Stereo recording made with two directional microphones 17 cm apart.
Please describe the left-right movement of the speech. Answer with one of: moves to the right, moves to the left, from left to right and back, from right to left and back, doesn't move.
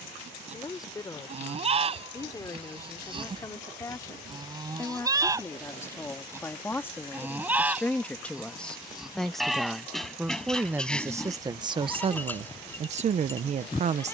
moves to the right.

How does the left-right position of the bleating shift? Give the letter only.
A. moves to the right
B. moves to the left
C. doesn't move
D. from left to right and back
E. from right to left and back
B.